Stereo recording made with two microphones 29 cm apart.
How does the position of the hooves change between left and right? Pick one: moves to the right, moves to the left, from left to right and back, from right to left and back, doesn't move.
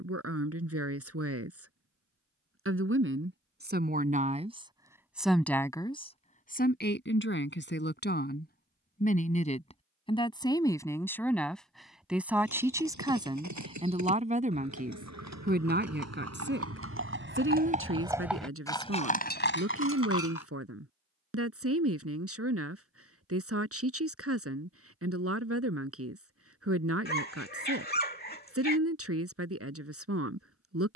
moves to the left.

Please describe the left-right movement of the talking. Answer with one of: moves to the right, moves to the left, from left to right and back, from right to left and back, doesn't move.
from right to left and back.